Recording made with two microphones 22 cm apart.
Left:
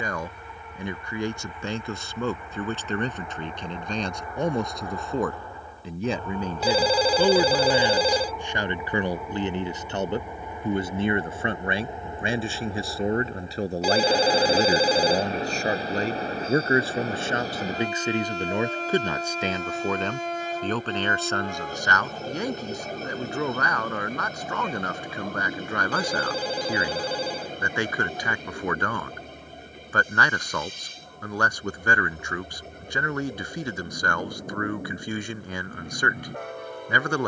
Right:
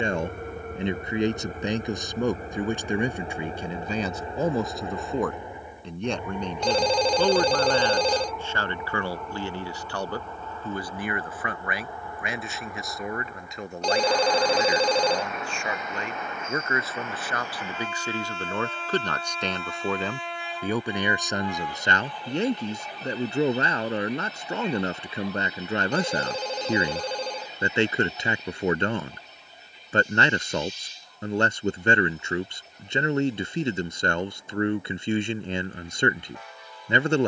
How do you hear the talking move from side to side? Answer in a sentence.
You can hear the talking move from right to left and back again.